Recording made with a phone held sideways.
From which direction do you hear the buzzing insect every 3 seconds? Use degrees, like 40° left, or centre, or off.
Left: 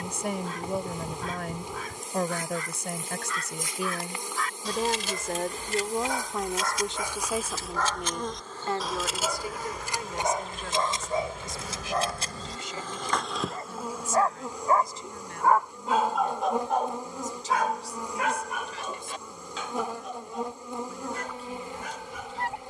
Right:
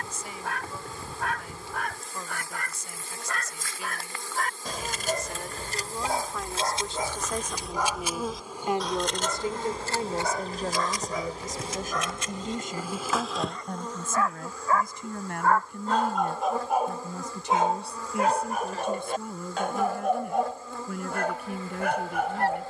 20° left, 20° left, centre, 30° right, centre, 20° left, 20° left, 20° left.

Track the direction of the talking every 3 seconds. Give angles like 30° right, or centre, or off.
70° left, 60° left, 10° left, 40° right, 50° right, 60° right, 60° right, 70° right.